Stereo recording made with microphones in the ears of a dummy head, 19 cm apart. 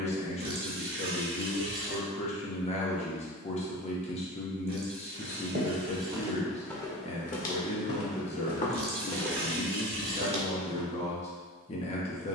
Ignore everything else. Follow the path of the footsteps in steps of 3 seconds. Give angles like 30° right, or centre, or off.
off, 40° right, 30° left, 10° right.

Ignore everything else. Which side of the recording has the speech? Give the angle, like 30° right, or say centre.
30° left.